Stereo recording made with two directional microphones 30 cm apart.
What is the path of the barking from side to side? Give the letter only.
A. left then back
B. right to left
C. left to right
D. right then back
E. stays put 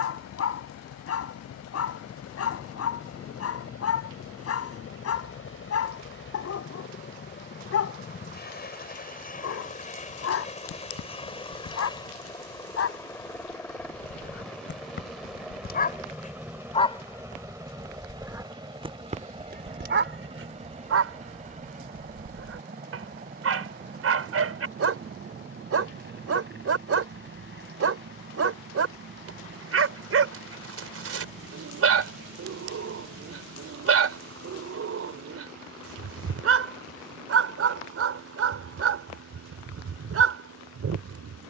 C.